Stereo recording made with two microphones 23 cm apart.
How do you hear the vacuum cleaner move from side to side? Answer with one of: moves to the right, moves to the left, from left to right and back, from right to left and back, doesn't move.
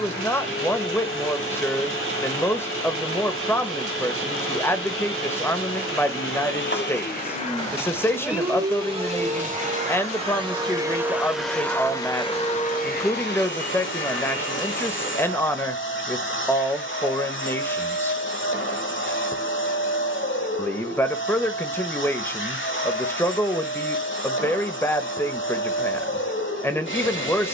from left to right and back.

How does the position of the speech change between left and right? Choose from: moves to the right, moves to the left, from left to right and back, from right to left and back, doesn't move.
doesn't move.